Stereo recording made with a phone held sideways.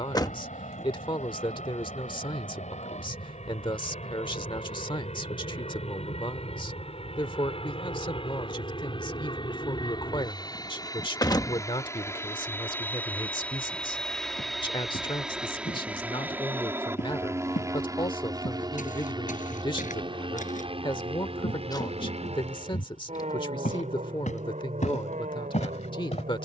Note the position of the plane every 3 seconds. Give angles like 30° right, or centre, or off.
60° left, 50° left, 40° left, 30° left, 10° left, 10° right, 30° right, 40° right, 50° right.